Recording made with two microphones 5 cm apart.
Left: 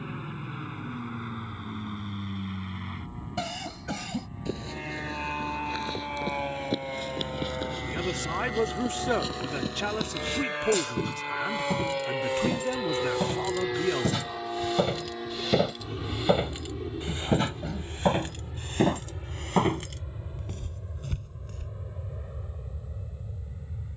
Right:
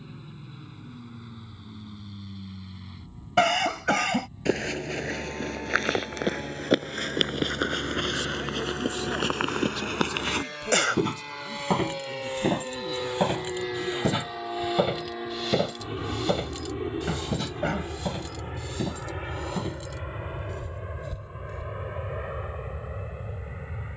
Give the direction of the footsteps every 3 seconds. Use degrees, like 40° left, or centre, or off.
off, 70° right, 70° right, 60° right, 30° right, 10° left, 50° left, 60° left.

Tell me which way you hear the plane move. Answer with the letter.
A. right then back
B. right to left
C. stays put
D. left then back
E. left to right
E.